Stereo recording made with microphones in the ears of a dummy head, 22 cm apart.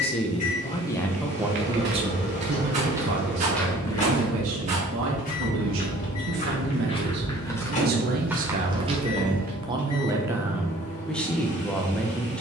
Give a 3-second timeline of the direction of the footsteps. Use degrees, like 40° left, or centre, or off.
40° right, 20° left, 10° left, 30° right.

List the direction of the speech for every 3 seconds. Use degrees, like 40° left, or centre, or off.
10° right, 60° right, 40° right, 10° right.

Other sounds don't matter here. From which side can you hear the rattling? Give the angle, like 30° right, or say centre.
30° right.